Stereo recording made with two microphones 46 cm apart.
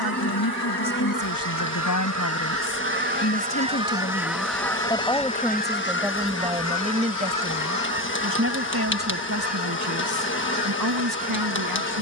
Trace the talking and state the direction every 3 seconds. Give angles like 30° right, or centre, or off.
40° left, 10° left, 20° right, 40° right.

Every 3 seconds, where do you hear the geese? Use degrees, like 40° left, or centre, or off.
40° right, centre, 40° left, 60° left.